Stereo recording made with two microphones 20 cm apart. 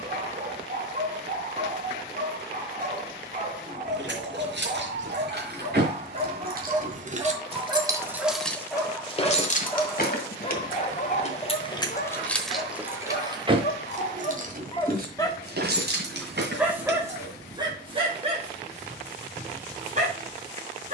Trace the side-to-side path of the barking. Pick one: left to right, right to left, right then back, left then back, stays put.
left then back.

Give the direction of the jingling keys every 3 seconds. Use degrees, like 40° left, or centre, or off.
off, 60° right, 20° right, 40° left, 20° right, 60° right, off.